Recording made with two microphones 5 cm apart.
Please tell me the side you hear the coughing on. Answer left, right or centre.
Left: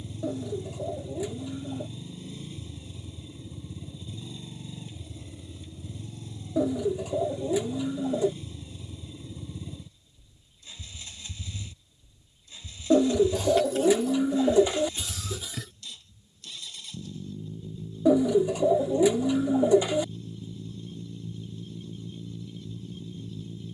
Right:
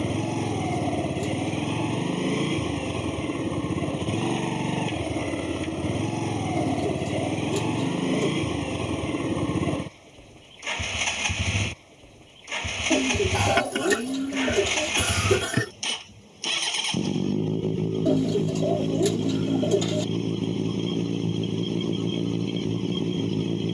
right.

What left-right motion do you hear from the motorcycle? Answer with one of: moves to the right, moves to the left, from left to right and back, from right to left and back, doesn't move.
doesn't move.